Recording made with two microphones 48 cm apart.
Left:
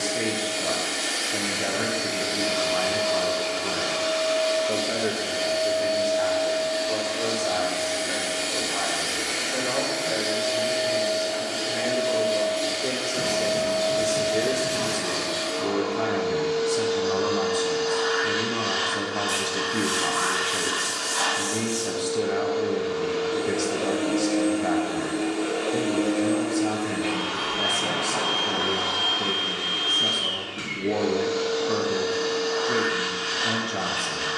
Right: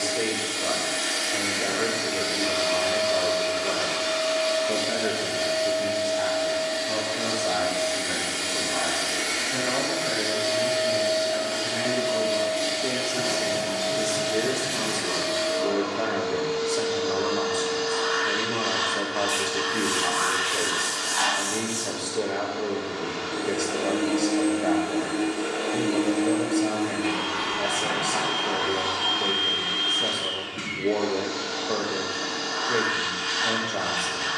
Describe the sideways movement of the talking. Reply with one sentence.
In this clip you hear the talking go right and come back.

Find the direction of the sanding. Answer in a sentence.
You can hear the sanding on the left.